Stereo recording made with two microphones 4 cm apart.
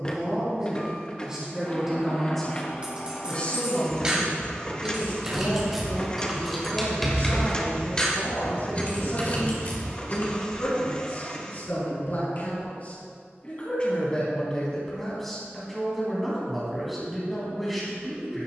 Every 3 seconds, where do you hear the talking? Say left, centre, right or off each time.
centre, left, left, left, left, centre.